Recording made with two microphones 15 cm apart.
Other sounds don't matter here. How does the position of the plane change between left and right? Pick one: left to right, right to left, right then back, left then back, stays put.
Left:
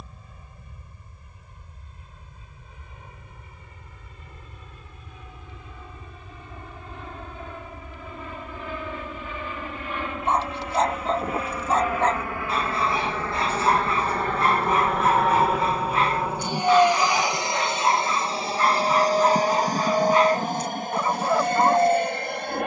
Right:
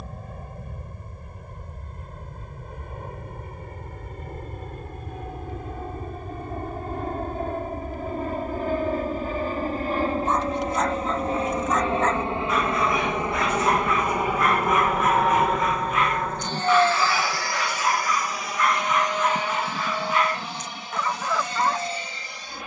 right to left.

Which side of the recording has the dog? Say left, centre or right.
left.